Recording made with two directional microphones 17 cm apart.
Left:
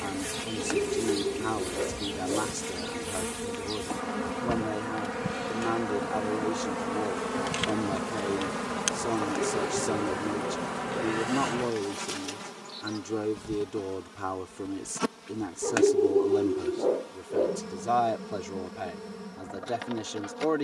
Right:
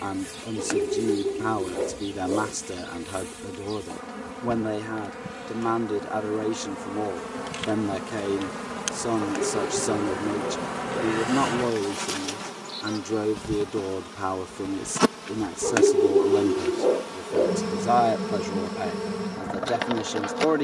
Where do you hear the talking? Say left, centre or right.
right.